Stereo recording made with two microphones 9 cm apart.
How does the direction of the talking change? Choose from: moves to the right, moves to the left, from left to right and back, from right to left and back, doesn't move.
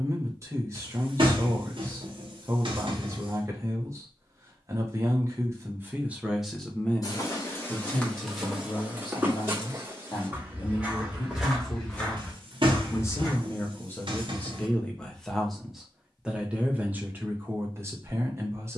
from right to left and back.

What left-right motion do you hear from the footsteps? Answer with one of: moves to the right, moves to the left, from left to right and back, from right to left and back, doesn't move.
from left to right and back.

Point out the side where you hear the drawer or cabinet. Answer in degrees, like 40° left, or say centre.
60° right.